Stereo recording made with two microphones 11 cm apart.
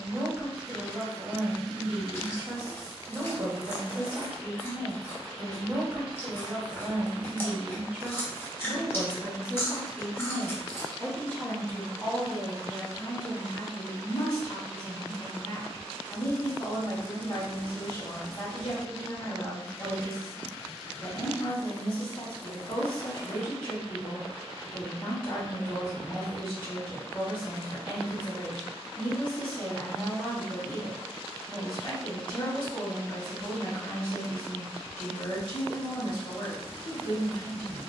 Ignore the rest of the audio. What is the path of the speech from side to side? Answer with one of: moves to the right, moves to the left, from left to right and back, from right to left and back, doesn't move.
moves to the left.